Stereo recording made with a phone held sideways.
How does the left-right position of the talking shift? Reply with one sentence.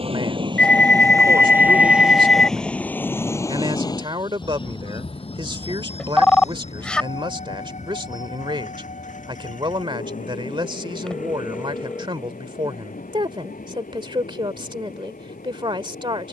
You can hear the talking stay in one place.